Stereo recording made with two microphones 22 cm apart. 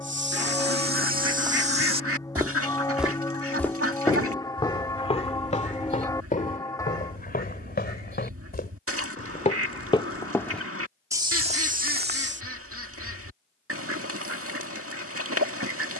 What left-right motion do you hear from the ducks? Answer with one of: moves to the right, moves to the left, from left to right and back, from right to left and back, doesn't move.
doesn't move.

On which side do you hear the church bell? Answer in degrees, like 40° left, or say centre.
10° left.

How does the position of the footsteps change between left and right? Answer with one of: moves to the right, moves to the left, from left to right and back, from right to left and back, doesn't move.
from right to left and back.